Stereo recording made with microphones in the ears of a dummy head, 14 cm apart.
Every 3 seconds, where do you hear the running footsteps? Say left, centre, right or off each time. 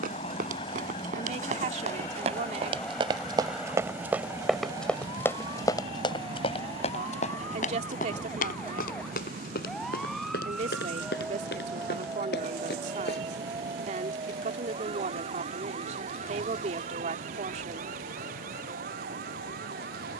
right, centre, left, left, left, off, off.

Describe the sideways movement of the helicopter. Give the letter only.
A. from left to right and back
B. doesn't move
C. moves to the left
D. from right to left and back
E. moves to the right
E.